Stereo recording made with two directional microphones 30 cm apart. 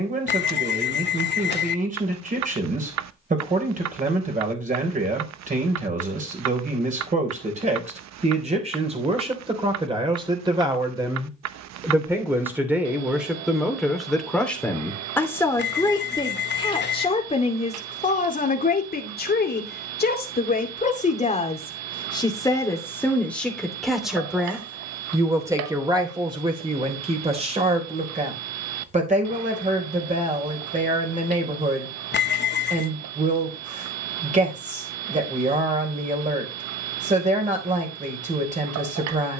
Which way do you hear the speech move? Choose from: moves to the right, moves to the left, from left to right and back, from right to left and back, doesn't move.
from right to left and back.